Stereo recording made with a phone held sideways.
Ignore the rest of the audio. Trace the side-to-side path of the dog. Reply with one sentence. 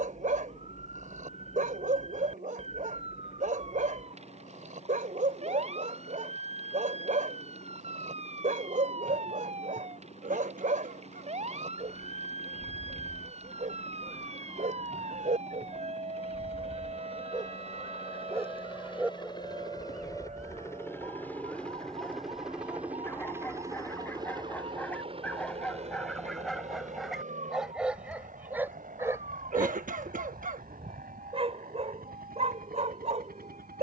You can hear the dog go left and come back.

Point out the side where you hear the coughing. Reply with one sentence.
You can hear the coughing on the right.